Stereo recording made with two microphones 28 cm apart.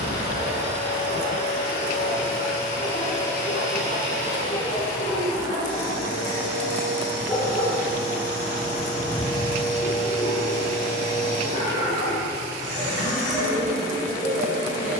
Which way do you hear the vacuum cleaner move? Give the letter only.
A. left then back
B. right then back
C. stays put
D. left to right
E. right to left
C.